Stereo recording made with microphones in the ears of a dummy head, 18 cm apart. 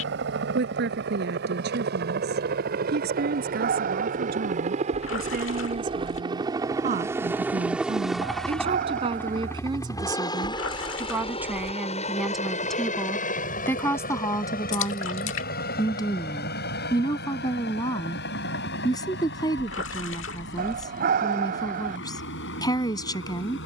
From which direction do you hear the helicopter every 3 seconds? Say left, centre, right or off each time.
right, right, centre, left, left, left, left, left.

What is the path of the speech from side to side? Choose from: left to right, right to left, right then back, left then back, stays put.
right to left.